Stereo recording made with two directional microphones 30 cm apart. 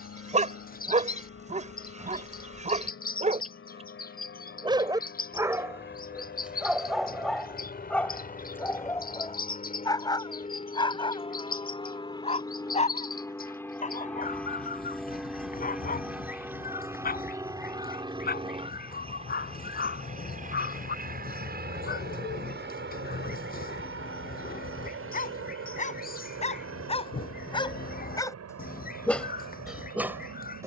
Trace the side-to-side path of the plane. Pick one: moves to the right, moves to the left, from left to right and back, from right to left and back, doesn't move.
moves to the right.